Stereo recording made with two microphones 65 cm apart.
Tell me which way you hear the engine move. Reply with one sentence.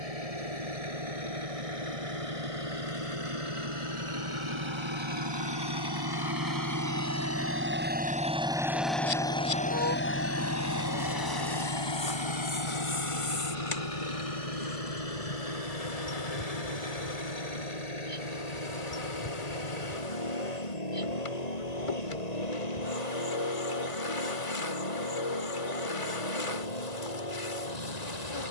In this clip you hear the engine go from the right side to the left.